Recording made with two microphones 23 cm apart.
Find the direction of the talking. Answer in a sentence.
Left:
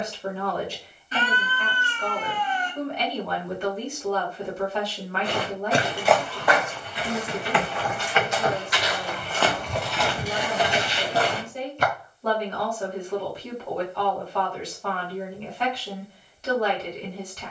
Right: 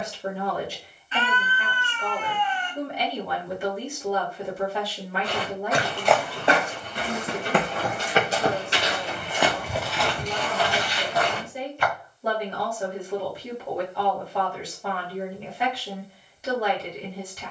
You can hear the talking in the centre.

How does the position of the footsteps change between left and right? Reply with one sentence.
You can hear the footsteps go right and come back.